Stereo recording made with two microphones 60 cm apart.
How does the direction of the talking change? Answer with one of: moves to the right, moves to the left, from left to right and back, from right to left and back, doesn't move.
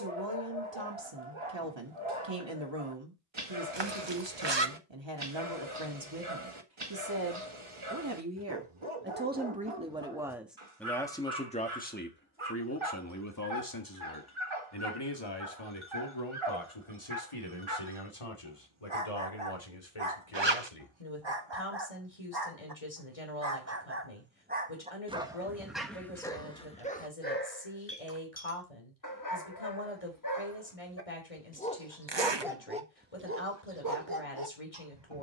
moves to the left.